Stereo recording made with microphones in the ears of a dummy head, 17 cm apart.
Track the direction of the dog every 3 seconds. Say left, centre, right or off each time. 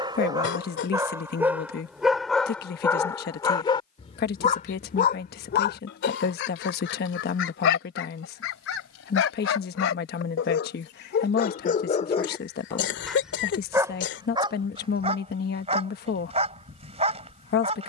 centre, left, left, left, centre, right.